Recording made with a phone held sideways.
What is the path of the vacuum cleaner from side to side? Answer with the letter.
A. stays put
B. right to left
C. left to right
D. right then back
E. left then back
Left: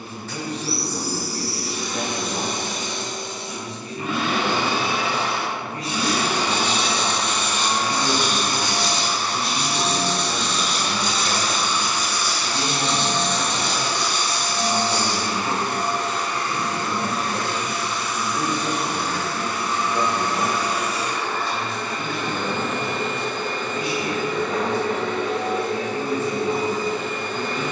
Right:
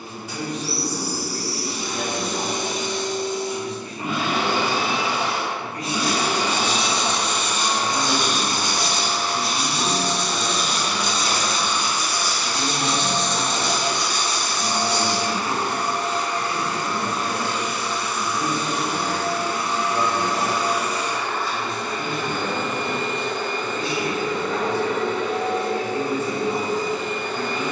A.